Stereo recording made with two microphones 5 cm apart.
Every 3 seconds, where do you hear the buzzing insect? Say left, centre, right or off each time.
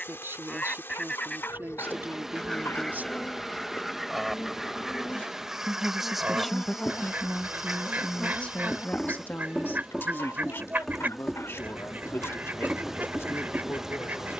left, left, left, centre, centre.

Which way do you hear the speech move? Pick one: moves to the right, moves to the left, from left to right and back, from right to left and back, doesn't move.
moves to the left.